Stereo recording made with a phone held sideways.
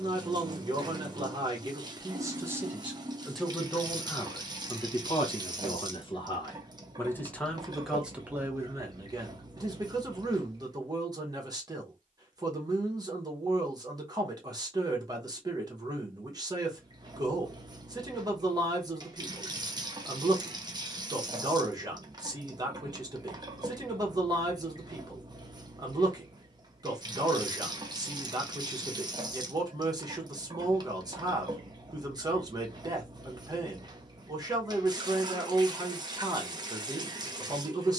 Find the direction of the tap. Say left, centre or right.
right.